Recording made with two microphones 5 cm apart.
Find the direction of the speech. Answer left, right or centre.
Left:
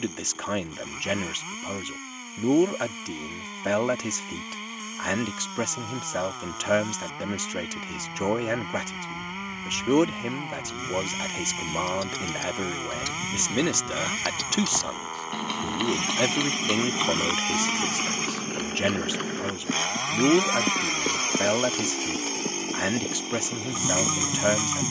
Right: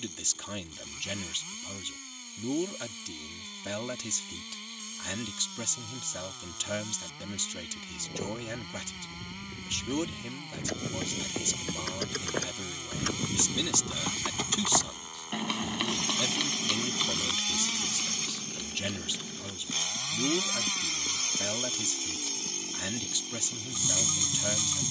left.